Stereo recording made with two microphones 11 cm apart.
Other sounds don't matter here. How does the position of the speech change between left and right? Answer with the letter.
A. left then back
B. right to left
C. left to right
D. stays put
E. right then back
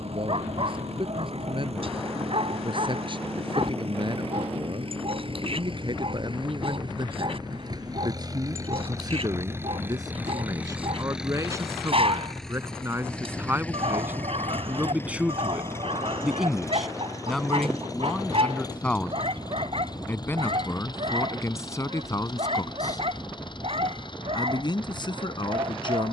B.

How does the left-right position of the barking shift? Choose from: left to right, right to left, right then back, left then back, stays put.
stays put.